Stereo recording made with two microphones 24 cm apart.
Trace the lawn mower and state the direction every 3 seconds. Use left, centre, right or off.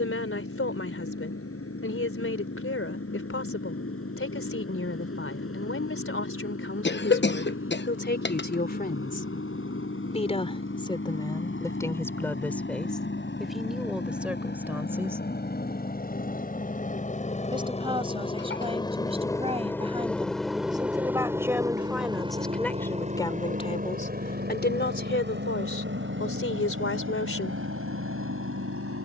left, left, left, left, left, left, centre, right, right, right.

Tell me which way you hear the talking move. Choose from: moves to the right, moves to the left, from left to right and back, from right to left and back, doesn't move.
from left to right and back.